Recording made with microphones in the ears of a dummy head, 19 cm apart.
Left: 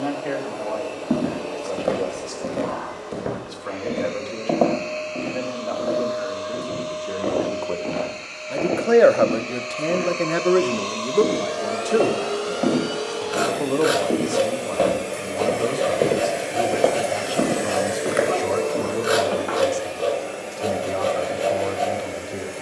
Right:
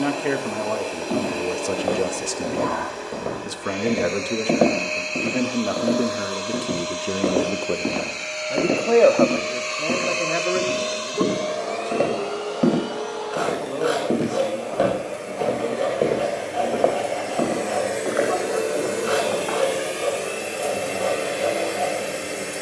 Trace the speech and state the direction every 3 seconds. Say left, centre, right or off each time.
right, right, right, left, left, left, left, left.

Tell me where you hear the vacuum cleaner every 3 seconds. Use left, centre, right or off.
right, right, right, right, left, left, right, right.